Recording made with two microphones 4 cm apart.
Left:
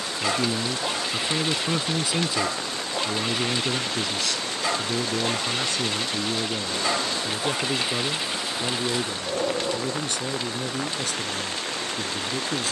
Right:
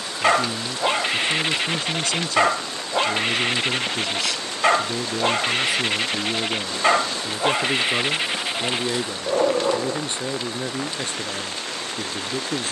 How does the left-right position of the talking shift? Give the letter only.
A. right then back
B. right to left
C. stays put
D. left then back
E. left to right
E.